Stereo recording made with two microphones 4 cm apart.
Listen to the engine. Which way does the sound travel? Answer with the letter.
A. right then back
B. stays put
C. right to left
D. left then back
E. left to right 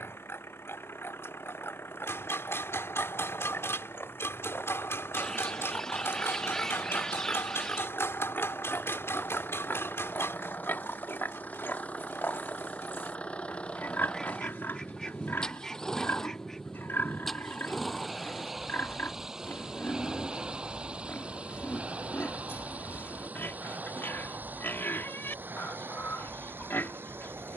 E.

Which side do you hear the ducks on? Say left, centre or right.
centre.